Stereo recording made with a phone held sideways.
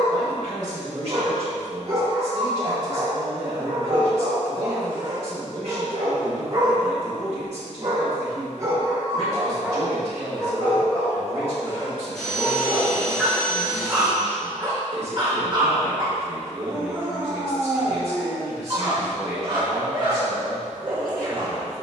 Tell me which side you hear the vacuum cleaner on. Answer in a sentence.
You can hear the vacuum cleaner in the centre.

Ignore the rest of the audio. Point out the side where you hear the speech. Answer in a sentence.
In this clip you hear the speech on the right.